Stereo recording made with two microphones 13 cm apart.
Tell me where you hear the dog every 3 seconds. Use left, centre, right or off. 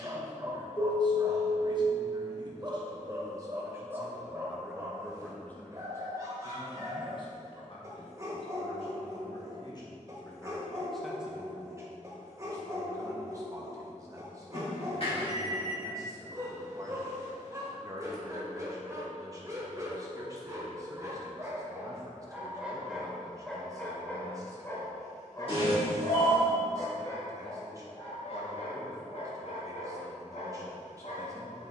right, right, right, right, right, right, right, centre, left, left, left.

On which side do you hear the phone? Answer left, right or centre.
left.